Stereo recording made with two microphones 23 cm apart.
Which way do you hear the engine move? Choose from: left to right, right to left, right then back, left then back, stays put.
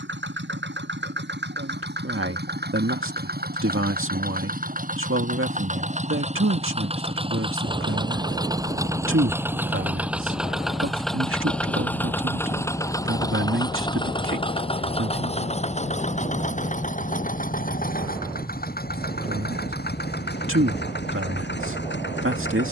right to left.